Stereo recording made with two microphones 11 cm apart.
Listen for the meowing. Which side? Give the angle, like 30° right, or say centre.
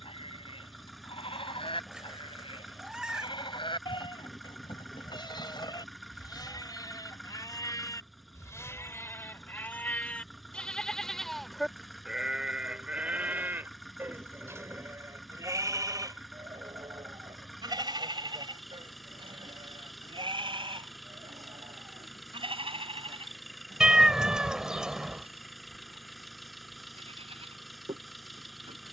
10° right.